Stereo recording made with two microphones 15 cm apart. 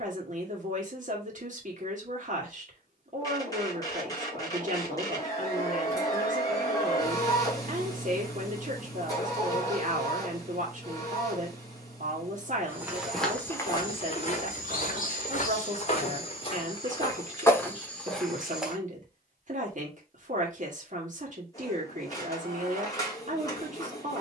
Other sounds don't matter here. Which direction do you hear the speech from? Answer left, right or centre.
right.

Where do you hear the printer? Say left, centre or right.
left.